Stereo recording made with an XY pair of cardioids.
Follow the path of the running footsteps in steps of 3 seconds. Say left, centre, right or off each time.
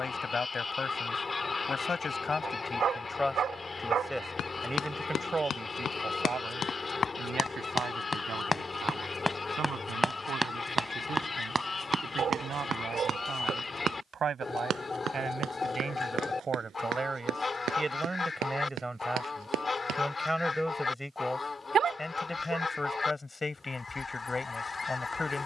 off, left, left, centre, right, right, right, off, off.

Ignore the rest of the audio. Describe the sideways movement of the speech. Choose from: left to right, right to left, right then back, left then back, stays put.
right then back.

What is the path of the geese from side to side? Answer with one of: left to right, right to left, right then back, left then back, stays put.
stays put.